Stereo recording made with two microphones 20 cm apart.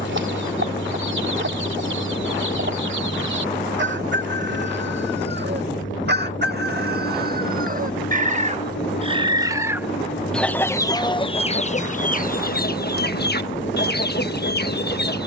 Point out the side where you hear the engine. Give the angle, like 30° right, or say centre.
70° left.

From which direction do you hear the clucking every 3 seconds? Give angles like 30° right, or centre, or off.
70° right, 70° right, 50° right, 10° left, 50° left.